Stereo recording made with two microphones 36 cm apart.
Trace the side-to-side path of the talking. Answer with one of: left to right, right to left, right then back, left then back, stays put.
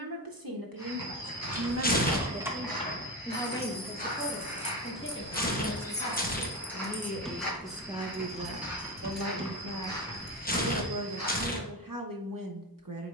left then back.